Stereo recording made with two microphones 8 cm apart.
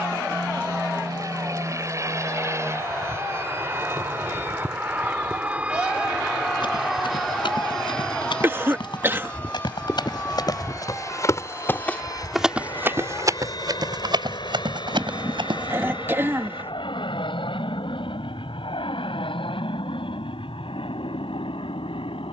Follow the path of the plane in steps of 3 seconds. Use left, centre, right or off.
right, right, centre, left, left, left, left, left.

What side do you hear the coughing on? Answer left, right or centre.
right.